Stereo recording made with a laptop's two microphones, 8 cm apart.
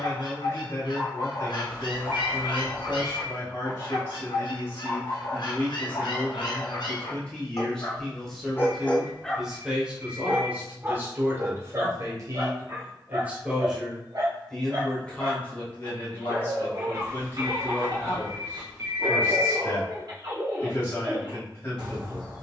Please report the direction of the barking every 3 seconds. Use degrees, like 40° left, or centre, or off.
70° left, 70° left, 50° left, 20° right, 50° right, 60° right, 60° right, 60° right.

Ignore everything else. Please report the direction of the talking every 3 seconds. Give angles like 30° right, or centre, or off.
30° left, 30° left, 10° left, 20° right, 20° right, 20° left, 30° left, 30° left.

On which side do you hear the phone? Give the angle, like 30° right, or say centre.
30° right.